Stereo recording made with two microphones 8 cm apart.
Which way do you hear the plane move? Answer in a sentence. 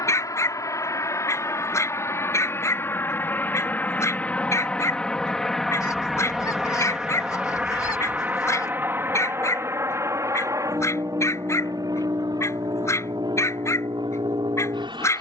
You can hear the plane go from the left side to the right.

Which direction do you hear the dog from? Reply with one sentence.
In this clip you hear the dog on the left.